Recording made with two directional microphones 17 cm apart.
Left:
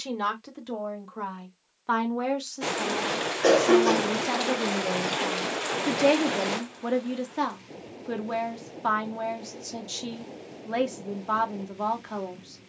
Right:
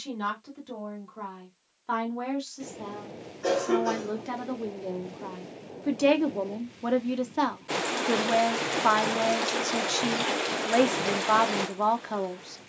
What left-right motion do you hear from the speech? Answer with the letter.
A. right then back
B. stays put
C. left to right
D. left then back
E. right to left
C.